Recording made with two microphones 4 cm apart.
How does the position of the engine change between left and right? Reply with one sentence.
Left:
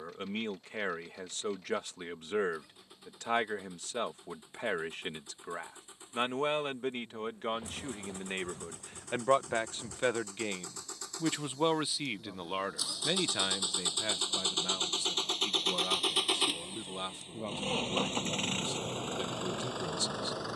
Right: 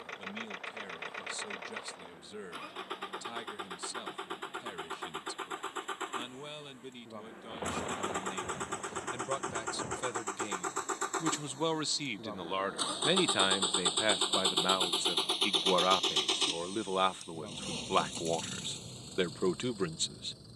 In this clip you hear the engine go from the right side to the left.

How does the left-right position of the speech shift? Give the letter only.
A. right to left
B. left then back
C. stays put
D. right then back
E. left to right
E.